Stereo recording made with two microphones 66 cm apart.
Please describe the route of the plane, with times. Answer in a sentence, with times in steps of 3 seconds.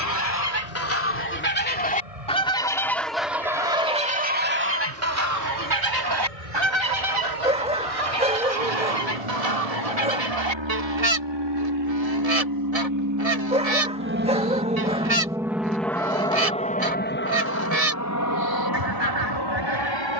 You can hear the plane on the right from 0 s, in the centre from 15 s and on the left from 18 s.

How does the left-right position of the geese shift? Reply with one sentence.
You can hear the geese move from left to right.